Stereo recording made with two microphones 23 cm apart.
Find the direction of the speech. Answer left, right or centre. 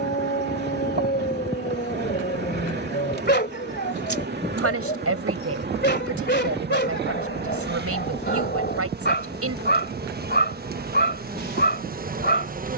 right.